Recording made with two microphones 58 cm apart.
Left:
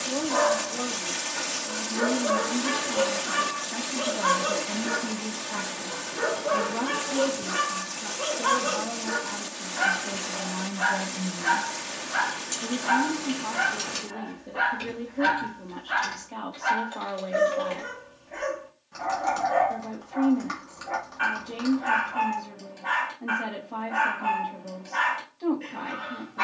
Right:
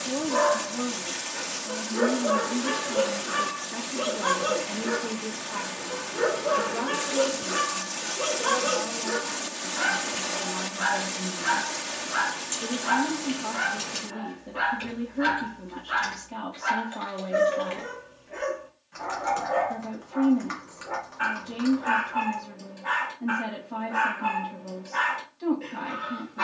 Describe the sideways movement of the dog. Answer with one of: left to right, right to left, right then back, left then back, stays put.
stays put.